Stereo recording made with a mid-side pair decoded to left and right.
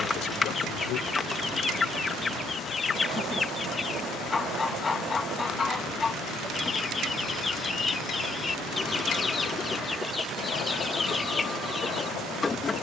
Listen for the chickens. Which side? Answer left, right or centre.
left.